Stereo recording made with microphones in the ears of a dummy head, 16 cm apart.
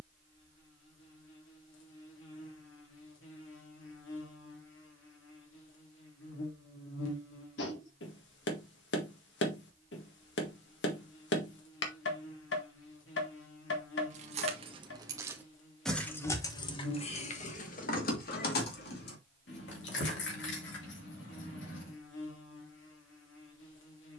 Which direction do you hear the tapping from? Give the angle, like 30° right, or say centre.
70° left.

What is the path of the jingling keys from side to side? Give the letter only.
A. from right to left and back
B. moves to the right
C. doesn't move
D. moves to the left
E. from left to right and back
D.